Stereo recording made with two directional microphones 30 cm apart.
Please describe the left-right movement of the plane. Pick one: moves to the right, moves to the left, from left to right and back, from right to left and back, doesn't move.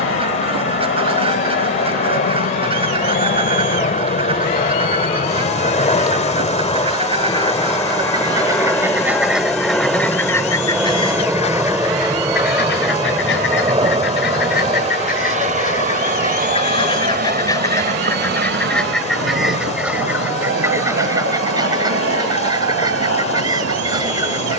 moves to the right.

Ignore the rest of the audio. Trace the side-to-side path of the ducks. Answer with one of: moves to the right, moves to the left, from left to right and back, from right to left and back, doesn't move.
from right to left and back.